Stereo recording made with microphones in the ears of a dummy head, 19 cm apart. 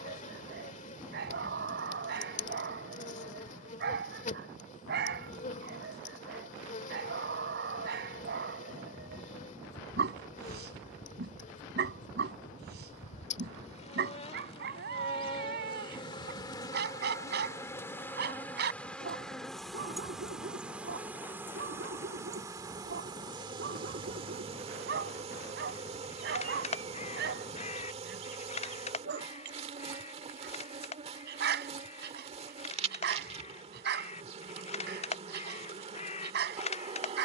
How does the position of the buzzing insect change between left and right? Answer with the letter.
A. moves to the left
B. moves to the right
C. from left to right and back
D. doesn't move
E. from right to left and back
B.